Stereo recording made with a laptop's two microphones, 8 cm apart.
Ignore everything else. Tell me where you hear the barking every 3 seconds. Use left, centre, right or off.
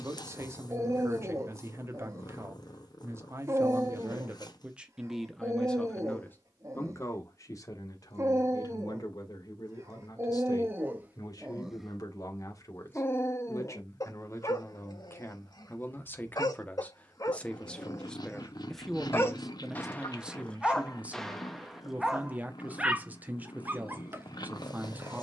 right, right, right, right, left, left, left, centre, right.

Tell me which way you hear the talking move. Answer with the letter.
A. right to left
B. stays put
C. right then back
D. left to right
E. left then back
E.